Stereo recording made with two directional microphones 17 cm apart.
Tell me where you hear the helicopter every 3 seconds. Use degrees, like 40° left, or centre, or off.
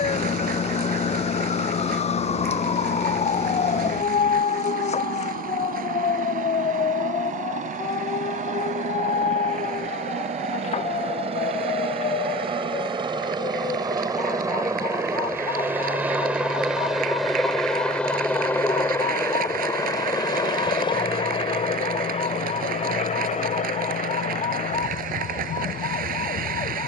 60° right, 60° right, 50° right, 40° right, 30° right, 10° right, 20° left, 40° left, 50° left.